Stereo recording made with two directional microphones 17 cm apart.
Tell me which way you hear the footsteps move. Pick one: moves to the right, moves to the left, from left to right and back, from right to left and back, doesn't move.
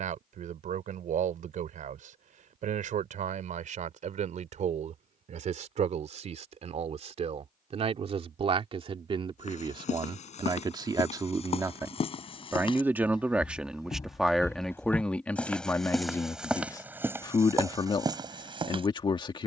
moves to the right.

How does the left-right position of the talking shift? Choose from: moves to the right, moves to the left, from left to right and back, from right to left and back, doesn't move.
moves to the left.